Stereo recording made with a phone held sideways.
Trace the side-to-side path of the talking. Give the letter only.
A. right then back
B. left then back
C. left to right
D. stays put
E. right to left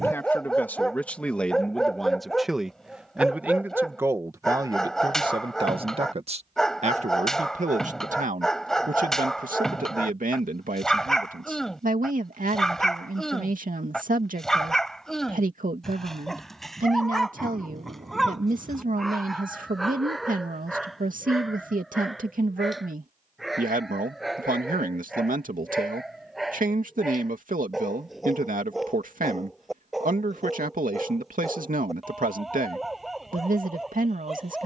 C.